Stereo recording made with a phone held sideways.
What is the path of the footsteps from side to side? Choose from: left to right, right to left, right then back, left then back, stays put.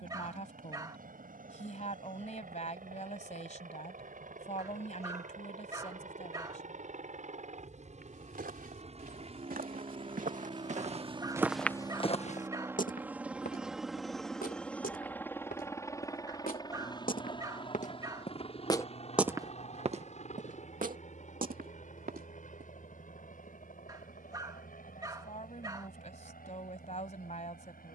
left then back.